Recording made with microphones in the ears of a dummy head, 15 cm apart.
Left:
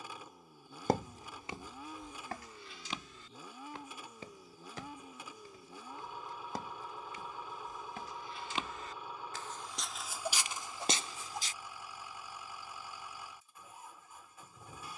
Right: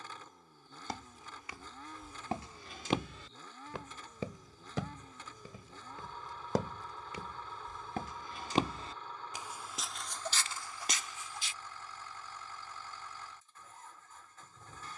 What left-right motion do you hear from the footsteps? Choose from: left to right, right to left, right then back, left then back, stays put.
right then back.